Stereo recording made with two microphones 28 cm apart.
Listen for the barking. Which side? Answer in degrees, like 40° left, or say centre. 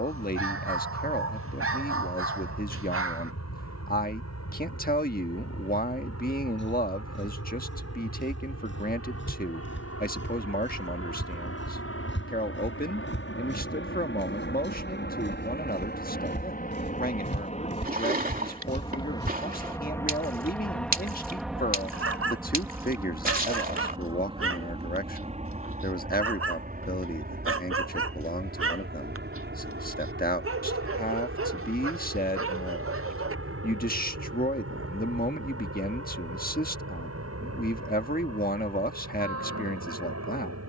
50° right.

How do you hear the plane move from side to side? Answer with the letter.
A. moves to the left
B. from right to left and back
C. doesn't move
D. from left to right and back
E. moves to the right
E.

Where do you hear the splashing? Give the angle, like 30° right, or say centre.
30° right.